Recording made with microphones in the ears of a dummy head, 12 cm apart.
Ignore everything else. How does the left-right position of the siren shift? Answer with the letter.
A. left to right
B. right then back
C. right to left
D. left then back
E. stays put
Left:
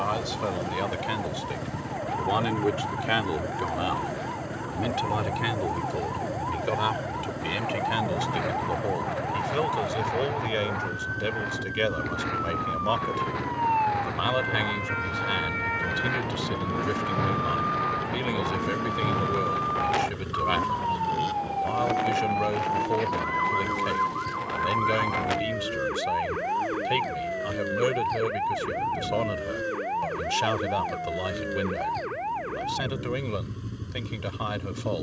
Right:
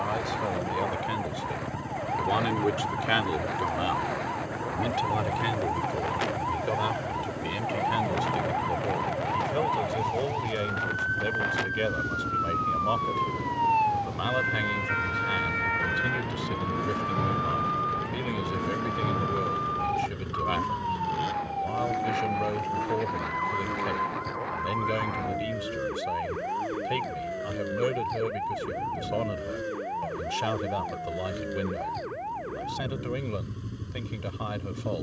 C.